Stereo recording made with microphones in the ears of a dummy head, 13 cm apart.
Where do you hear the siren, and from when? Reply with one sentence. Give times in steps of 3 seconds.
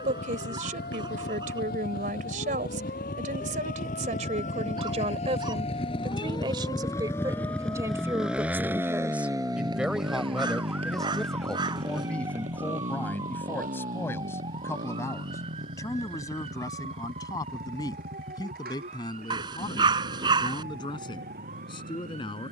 You can hear the siren on the left from 0 s, in the centre from 9 s and on the right from 12 s.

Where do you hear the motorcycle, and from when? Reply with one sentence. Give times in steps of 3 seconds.
In this clip you hear the motorcycle on the left from 0 s, in the centre from 6 s and on the right from 9 s.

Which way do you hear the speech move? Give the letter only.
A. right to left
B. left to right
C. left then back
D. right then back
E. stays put
A.